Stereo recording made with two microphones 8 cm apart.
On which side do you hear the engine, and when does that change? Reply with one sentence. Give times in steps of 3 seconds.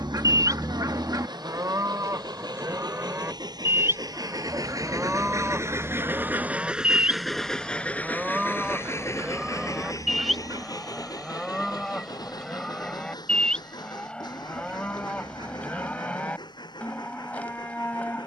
You can hear the engine on the right from 0 s, in the centre from 6 s and on the left from 9 s.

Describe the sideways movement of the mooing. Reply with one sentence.
You can hear the mooing travel towards the left.